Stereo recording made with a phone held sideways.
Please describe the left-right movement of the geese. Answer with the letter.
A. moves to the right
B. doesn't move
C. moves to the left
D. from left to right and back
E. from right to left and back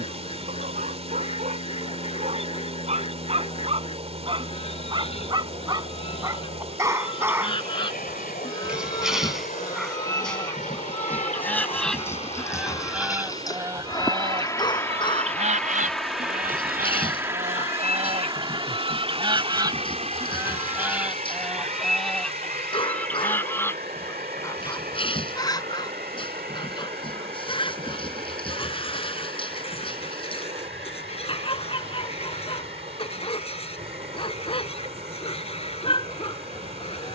D.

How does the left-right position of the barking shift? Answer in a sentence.
In this clip you hear the barking go from the right side to the left.